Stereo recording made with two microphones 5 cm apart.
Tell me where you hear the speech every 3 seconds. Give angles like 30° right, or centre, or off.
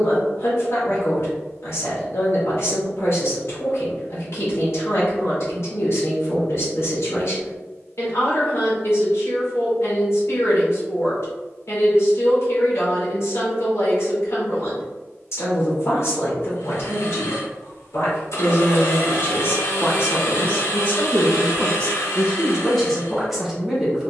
60° left, 60° left, 60° left, 60° left, 60° left, 60° left, 40° left, 10° left.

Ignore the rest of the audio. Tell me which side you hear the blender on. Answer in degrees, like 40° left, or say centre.
70° left.